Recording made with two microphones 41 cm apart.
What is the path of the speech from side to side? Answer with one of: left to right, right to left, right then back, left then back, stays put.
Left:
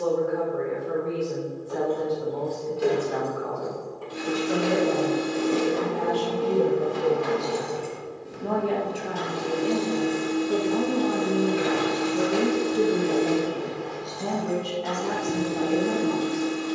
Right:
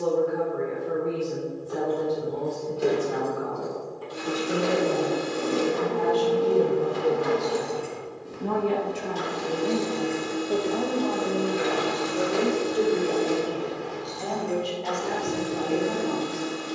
right to left.